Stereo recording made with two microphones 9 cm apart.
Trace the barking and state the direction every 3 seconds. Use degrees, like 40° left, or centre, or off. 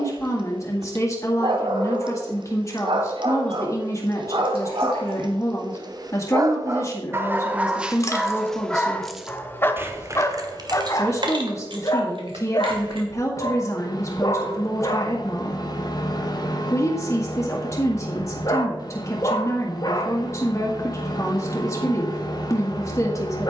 60° right, 60° right, 10° right, 30° left, 40° left, 40° left, 40° left, 40° left.